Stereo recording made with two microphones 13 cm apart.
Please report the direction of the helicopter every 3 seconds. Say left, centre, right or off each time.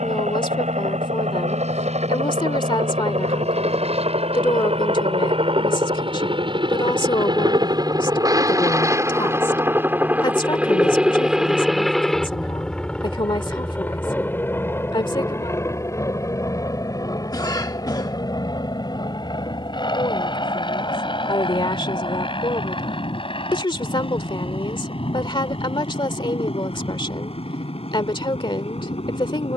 right, right, right, centre, centre, left, left, left, left, left.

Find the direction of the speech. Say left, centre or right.
left.